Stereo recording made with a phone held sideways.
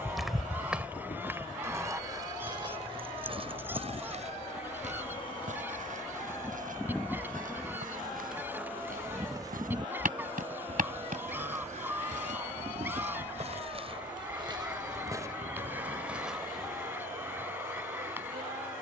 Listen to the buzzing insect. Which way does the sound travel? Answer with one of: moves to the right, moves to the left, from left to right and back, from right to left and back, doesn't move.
moves to the right.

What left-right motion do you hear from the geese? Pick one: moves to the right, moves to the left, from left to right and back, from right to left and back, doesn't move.
doesn't move.